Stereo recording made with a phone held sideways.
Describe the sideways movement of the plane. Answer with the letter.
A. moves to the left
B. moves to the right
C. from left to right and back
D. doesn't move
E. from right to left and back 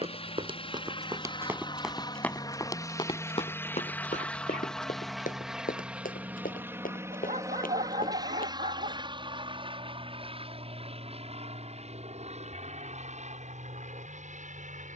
B.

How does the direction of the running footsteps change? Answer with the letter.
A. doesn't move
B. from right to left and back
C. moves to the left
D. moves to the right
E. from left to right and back
C.